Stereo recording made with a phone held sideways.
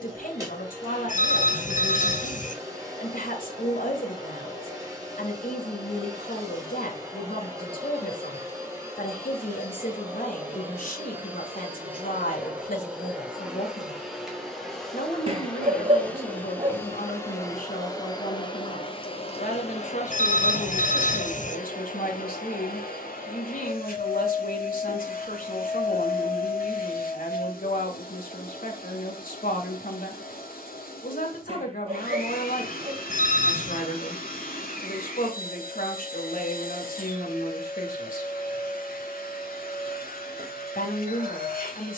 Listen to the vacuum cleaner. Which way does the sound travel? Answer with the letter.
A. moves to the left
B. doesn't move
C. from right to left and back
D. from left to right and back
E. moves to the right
A.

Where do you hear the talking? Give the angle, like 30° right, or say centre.
70° left.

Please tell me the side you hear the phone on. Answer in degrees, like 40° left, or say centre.
60° left.